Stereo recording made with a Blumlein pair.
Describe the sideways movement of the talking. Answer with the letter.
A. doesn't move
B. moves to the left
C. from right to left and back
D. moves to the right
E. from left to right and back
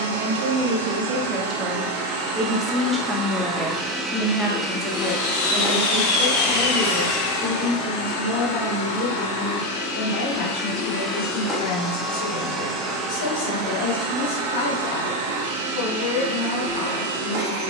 B.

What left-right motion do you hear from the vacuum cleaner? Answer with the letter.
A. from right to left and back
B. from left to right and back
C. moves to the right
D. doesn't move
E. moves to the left
A.